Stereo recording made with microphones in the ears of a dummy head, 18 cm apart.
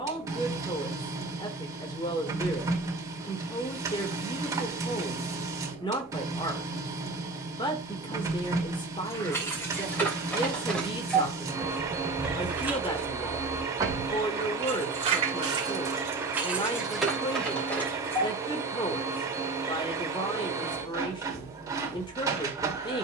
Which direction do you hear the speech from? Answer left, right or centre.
left.